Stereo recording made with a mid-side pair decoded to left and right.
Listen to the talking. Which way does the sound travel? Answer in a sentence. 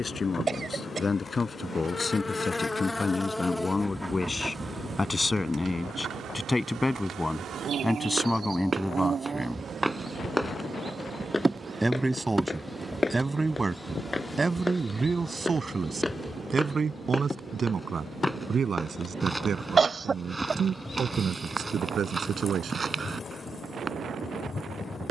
In this clip you hear the talking move to the right.